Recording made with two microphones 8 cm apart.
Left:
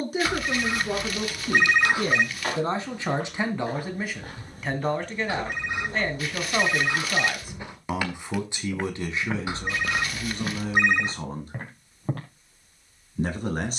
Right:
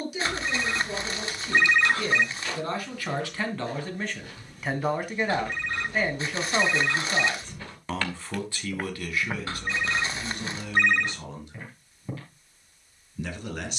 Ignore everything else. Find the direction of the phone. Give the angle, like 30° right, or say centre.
10° left.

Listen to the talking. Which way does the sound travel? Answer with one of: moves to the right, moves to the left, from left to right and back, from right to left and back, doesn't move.
from left to right and back.